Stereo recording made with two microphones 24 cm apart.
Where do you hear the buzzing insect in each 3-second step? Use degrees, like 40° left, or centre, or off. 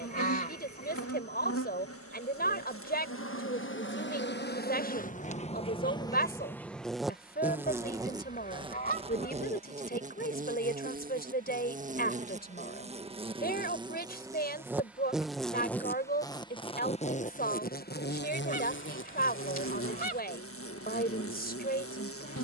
70° left, 40° left, 10° right, 30° right, 20° right, 20° left, 60° left, 70° left.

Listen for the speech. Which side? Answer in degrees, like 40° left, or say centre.
40° left.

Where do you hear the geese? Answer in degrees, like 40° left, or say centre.
40° left.